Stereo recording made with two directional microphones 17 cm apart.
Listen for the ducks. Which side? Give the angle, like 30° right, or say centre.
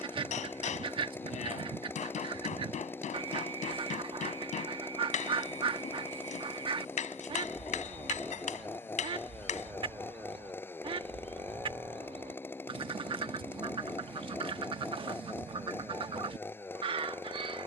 30° right.